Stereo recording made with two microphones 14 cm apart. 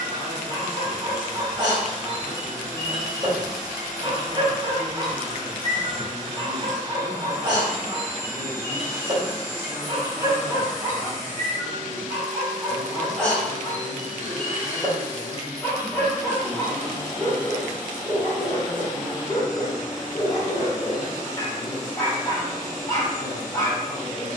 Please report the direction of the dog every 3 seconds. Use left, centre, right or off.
right, right, right, right, centre, left, left, left.